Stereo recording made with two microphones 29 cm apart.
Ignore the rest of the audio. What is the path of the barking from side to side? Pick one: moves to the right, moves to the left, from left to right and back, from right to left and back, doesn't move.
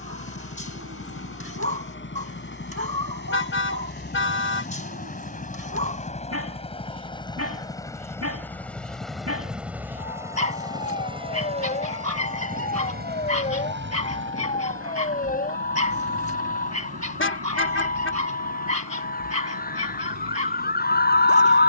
doesn't move.